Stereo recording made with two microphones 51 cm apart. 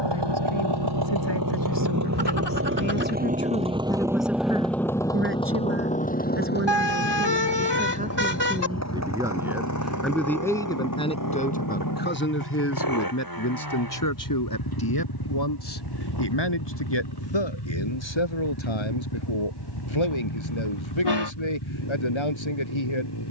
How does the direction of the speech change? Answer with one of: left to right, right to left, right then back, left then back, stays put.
right then back.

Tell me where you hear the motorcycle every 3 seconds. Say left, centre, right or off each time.
right, centre, left, left, left, left, left, left.